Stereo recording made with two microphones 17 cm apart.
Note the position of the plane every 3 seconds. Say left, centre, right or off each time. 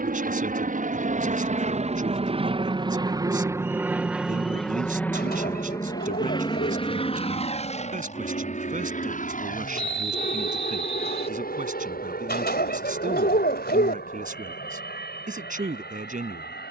right, centre, left, left, left, left.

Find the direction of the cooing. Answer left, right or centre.
left.